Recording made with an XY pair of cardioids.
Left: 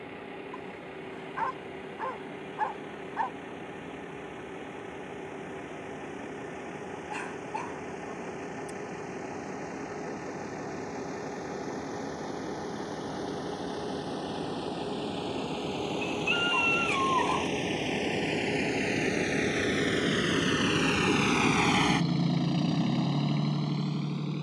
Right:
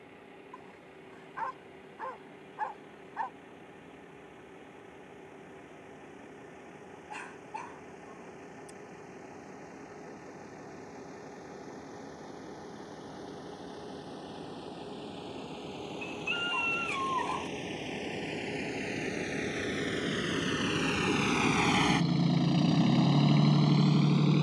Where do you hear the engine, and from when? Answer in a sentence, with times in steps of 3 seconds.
In this clip you hear the engine on the left from 0 s and in the centre from 21 s.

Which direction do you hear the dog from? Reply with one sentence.
You can hear the dog on the left.